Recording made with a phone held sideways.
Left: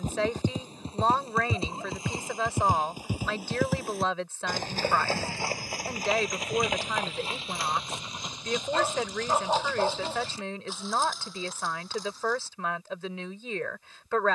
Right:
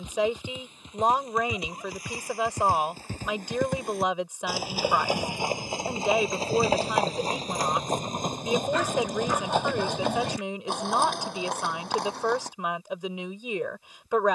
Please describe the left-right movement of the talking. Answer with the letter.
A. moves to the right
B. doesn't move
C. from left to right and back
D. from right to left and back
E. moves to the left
B.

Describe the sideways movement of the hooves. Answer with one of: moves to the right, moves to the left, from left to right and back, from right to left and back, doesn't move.
moves to the right.